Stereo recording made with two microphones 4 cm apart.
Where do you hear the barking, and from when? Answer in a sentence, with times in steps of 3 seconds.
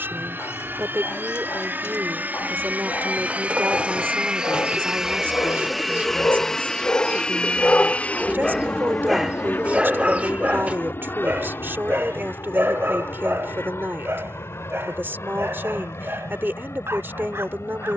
You can hear the barking on the left from 0 s and on the right from 9 s.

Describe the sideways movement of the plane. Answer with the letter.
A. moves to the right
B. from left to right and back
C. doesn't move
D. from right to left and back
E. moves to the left
E.